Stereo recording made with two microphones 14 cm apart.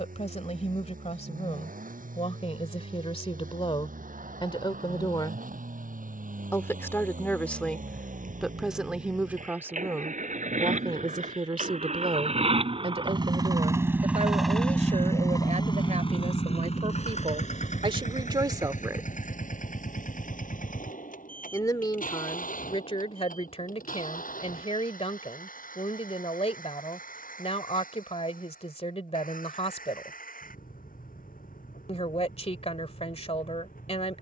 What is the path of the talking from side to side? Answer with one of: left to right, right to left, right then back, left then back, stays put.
right then back.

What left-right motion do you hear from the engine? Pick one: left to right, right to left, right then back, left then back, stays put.
right to left.